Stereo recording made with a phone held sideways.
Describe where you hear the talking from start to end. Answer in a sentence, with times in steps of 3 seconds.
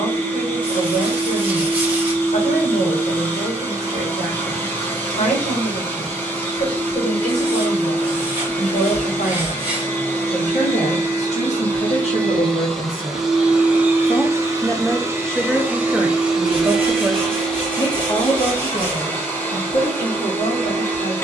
You can hear the talking on the left from 0 s, in the centre from 15 s and on the left from 18 s.